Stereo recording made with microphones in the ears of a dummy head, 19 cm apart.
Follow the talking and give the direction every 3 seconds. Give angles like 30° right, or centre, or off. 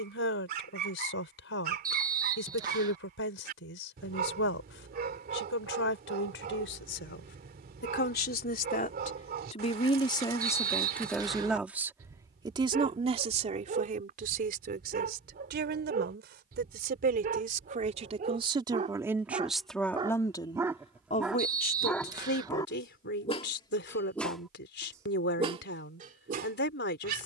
60° left, 60° left, 50° left, 10° left, 40° right, 50° right, 10° right, 50° left, 50° left.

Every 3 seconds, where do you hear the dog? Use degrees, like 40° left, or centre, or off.
40° right, 40° right, 40° right, 40° right, 40° right, 40° right, 30° right, 10° left, 30° right.